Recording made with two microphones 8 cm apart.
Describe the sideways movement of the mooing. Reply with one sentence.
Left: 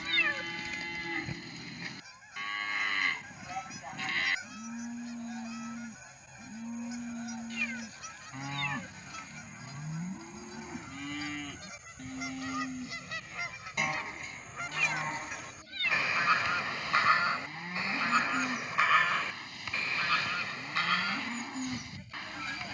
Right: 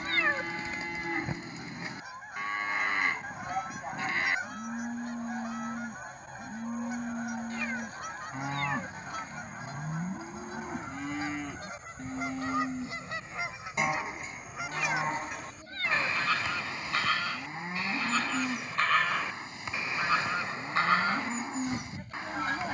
You can hear the mooing stay in one place.